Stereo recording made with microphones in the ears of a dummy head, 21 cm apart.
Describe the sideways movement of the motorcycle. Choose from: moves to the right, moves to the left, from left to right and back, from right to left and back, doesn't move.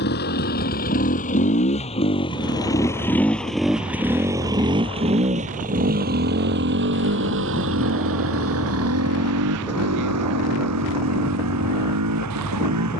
moves to the right.